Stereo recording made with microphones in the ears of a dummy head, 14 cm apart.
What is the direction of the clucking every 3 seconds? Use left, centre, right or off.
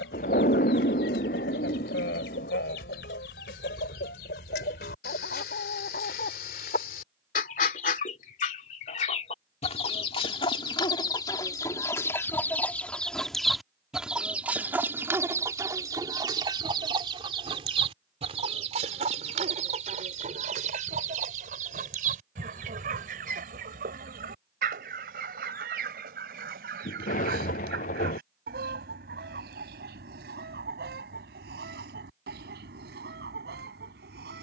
left, left, left, left, centre, right, right, right, right, right, right, right.